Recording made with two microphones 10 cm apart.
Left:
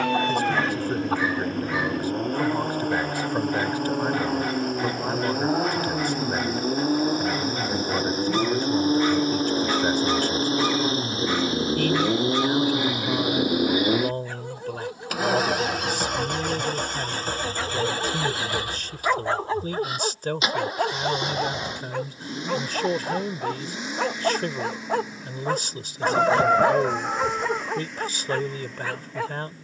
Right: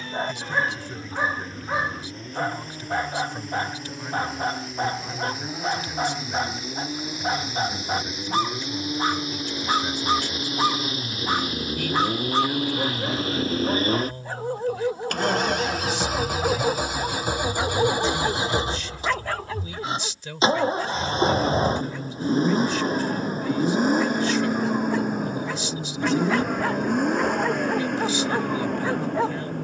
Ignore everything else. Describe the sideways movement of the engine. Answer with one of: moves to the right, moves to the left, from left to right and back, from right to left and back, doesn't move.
moves to the right.